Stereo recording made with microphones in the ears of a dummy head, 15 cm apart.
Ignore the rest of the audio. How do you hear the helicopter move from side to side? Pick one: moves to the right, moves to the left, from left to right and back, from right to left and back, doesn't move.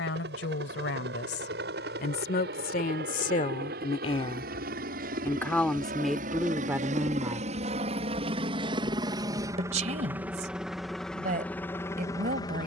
moves to the left.